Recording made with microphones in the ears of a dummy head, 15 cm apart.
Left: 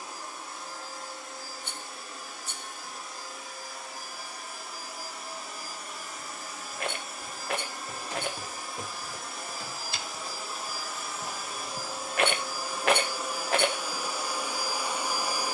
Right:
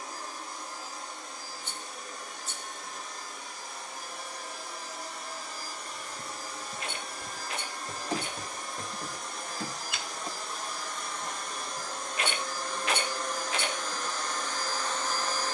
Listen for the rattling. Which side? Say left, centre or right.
left.